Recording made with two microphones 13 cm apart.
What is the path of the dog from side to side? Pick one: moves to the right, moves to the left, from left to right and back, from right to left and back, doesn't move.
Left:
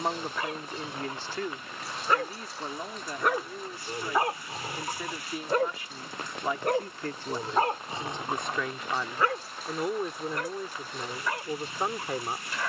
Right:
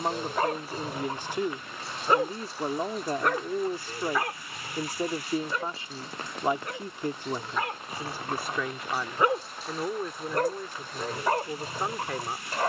from right to left and back.